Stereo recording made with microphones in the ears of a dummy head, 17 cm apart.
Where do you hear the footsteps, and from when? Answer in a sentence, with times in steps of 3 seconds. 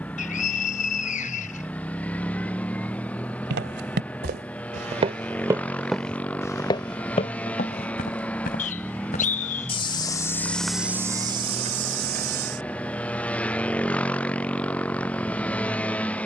You can hear the footsteps not at all from 0 s, on the right from 3 s, on the left from 6 s, in the centre from 9 s, on the right from 12 s and not at all from 15 s.